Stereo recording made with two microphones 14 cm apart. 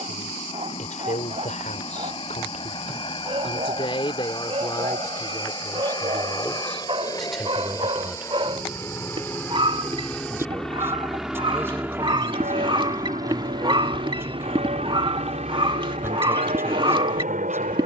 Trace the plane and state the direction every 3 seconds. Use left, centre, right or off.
left, left, left, centre, right, right.